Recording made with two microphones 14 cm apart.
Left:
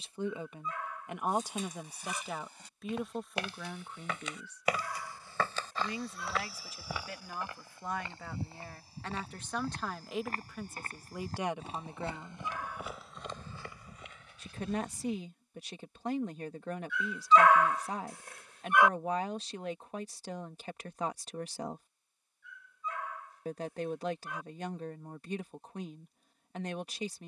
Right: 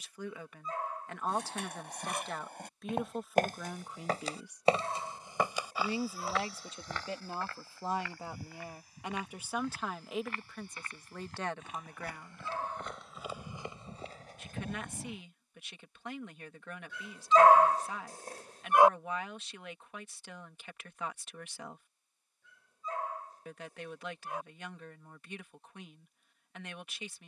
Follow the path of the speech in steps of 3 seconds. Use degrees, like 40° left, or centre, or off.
10° left, 10° right, 20° right, centre, 30° left, 40° left, 40° left, 40° left, 40° left.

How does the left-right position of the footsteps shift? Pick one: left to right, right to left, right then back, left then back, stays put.
left then back.